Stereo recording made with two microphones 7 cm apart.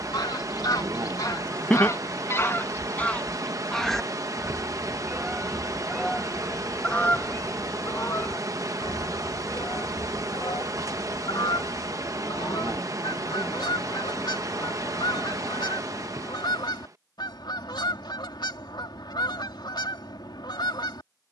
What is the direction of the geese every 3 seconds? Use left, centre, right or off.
left, centre, left, left, left, left, left.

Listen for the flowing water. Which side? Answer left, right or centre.
right.